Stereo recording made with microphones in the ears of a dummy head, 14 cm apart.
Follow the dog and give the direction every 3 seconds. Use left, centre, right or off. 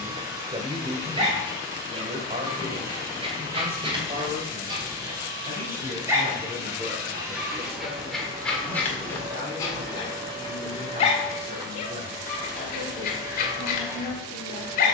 right, right, centre, left, left.